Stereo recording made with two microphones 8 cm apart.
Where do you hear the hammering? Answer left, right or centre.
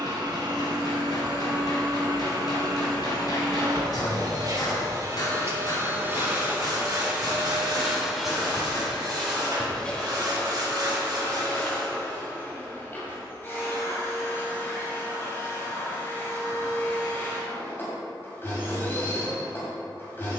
left.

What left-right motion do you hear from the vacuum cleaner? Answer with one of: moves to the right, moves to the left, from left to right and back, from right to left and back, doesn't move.
moves to the left.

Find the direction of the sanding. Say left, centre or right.
right.